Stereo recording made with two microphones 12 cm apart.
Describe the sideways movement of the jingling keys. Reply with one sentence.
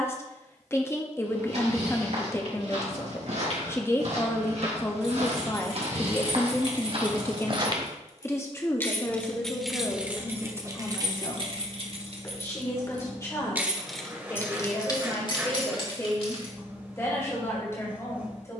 You can hear the jingling keys go right and come back.